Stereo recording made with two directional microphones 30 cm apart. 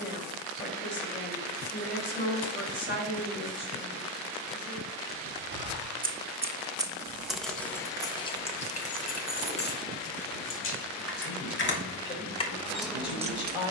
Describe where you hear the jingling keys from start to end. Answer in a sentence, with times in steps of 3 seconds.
In this clip you hear the jingling keys not at all from 0 s, on the right from 3 s, in the centre from 6 s, on the left from 9 s and in the centre from 12 s.